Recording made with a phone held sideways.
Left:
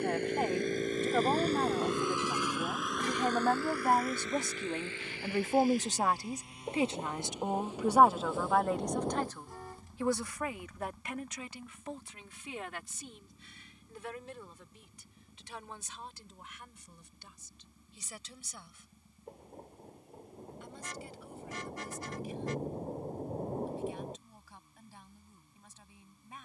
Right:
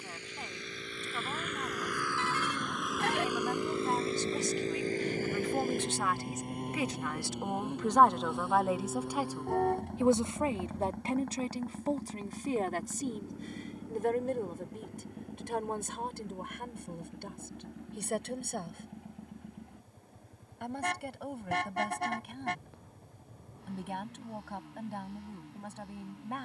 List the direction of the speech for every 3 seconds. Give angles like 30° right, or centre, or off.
70° left, 50° left, 10° left, 30° right, 50° right, 60° right, 60° right, 70° right, 70° right.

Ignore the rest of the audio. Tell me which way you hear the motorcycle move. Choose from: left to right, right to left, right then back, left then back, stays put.
left to right.